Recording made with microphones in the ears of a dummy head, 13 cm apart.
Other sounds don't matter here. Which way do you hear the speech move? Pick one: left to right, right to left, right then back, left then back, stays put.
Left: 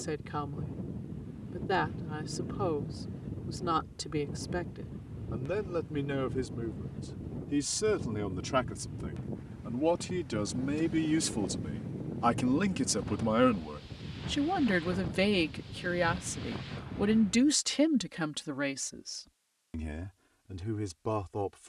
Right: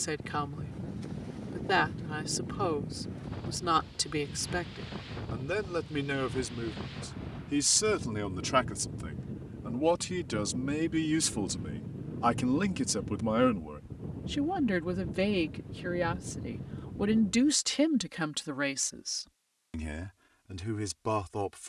left then back.